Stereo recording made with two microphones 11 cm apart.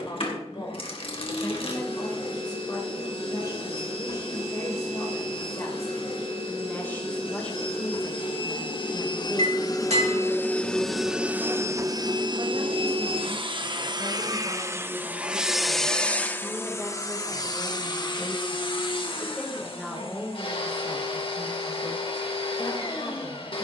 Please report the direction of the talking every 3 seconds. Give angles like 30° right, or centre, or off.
40° left, 40° left, 10° left, 30° right, 40° right, 20° right, centre, 30° left.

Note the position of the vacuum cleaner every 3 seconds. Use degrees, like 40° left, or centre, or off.
60° left, 60° left, 60° left, 10° left, 40° right, 20° left, 50° left, 60° left.